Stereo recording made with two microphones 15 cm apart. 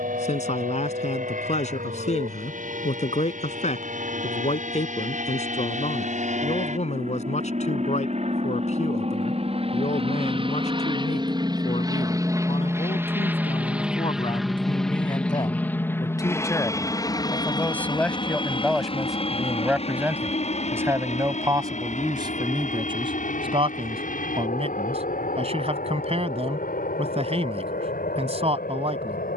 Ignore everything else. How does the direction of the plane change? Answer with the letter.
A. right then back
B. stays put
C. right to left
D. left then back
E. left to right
C.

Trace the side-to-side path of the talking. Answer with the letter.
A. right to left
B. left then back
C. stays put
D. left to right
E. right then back
D.